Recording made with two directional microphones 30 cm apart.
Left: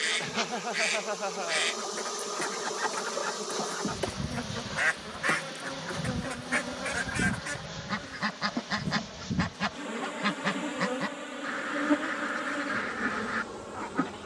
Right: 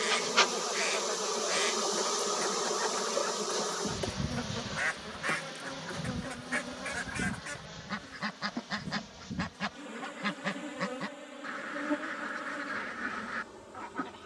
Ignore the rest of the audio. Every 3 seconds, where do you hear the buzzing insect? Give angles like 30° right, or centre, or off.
30° right, centre, 30° left, 50° left, 50° left.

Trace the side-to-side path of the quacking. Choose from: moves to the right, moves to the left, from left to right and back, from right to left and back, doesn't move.
doesn't move.